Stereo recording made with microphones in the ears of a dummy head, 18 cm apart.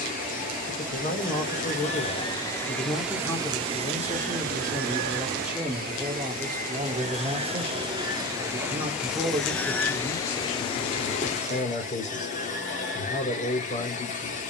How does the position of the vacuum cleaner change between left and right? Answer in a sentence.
You can hear the vacuum cleaner move from left to right and back again.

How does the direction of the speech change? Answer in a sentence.
In this clip you hear the speech move from left to right and back again.